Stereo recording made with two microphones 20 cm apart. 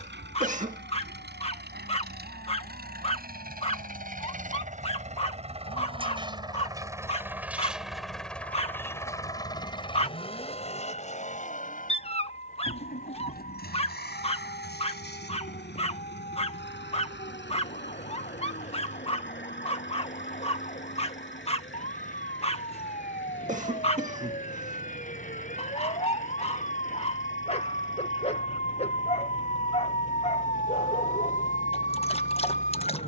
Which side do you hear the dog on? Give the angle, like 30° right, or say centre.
30° left.